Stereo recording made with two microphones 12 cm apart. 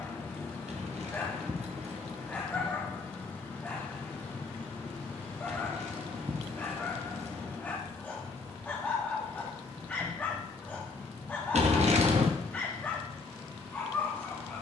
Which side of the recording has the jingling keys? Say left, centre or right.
right.